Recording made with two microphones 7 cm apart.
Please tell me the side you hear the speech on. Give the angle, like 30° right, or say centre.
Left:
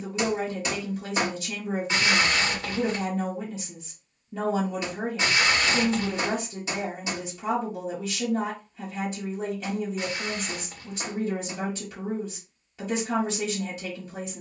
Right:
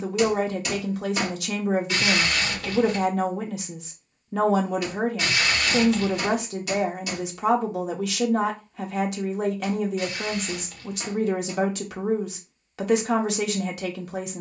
80° right.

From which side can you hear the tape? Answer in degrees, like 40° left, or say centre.
30° left.